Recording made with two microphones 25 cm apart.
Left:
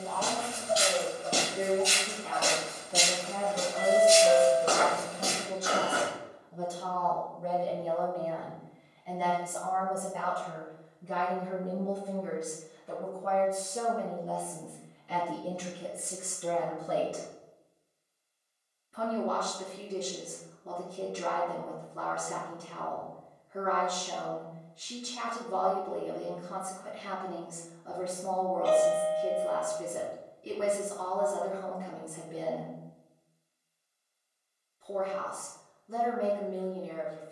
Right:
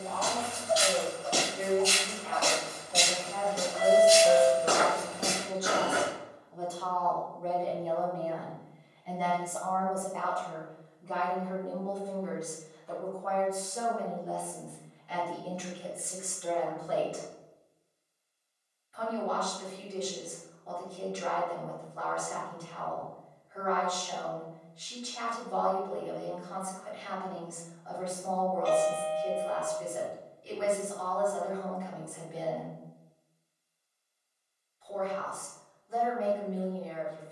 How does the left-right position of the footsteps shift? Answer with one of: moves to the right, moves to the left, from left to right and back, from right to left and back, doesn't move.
moves to the right.